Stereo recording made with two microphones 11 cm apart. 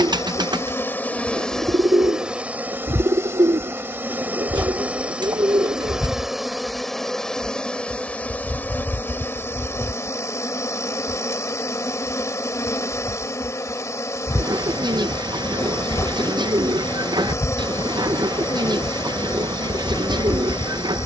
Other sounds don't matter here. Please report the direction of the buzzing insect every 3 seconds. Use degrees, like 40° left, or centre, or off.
10° left, 20° right, 10° left, 30° left, 30° left, 30° left, 30° left.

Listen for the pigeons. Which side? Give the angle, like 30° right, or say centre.
40° right.